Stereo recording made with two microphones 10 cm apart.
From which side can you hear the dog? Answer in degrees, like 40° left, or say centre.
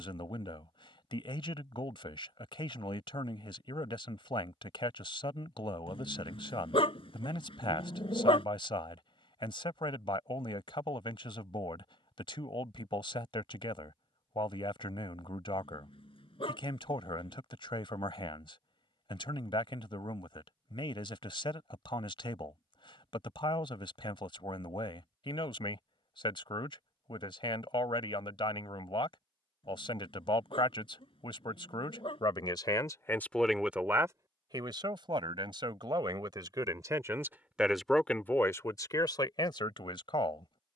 70° left.